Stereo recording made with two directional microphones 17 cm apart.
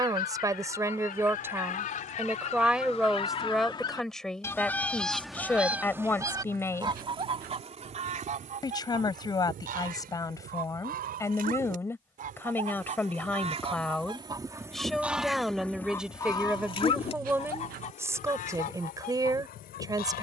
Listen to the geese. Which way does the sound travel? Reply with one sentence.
You can hear the geese move from left to right and back again.